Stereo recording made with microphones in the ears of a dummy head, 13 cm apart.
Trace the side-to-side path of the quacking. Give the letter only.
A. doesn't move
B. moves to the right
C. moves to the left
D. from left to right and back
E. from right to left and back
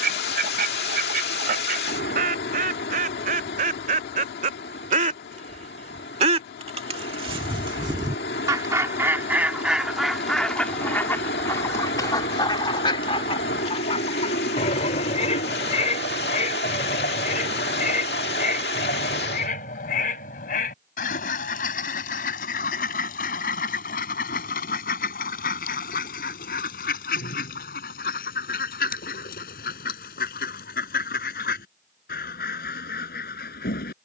C.